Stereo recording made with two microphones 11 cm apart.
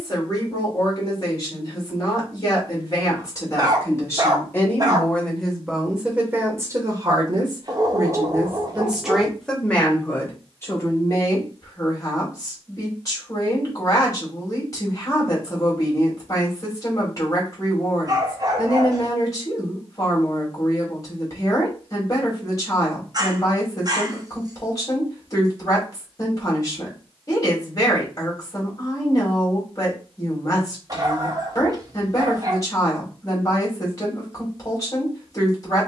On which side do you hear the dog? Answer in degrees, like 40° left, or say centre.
40° right.